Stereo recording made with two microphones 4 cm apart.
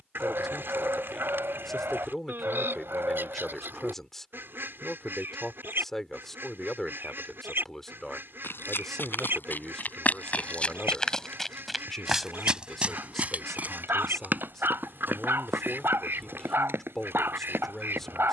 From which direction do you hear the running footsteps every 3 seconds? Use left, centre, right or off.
off, off, left, left, right, right.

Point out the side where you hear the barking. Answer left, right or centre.
right.